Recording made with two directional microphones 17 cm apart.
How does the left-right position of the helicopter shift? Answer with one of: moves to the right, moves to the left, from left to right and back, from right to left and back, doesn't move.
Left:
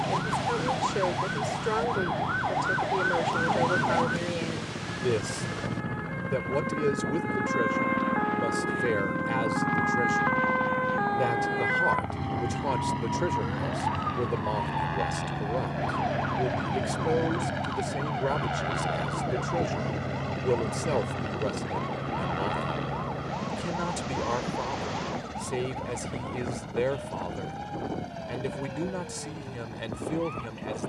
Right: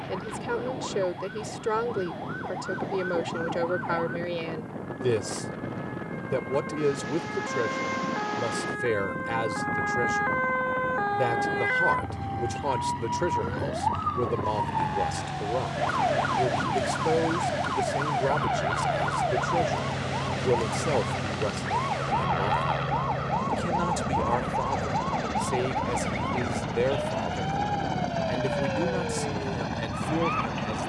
moves to the right.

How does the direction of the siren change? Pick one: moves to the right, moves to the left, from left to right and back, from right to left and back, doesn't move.
moves to the right.